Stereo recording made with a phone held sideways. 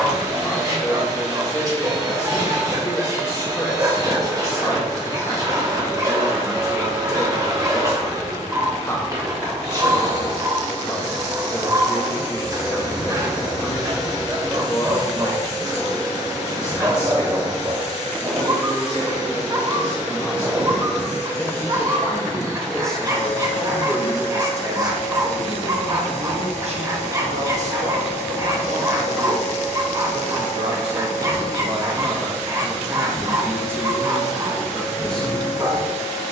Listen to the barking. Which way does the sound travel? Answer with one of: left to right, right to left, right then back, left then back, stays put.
stays put.